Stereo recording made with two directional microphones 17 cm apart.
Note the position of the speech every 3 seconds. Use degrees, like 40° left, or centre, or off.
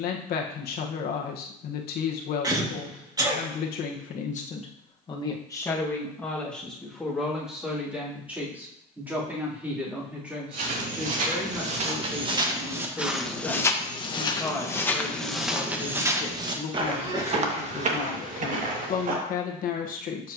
70° left, 40° left, centre, 10° right, centre, 30° left, 50° left.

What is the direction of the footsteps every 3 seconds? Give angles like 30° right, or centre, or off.
off, off, off, 50° right, centre, 20° right, 50° right.